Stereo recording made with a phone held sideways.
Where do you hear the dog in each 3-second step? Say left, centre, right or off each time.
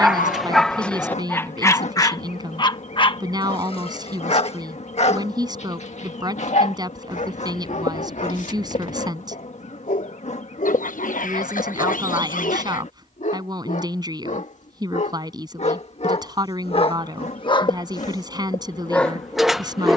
centre, left, left, left, left, left, centre.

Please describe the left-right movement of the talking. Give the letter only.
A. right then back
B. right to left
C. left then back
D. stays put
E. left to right
D.